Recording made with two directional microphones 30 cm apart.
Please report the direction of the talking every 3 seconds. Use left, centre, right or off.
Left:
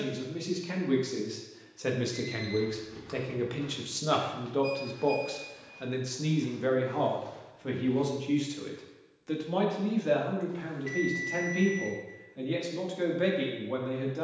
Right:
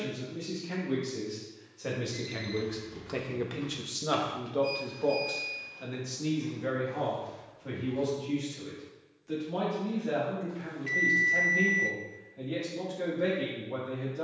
left, centre, left, left, left.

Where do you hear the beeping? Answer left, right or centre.
centre.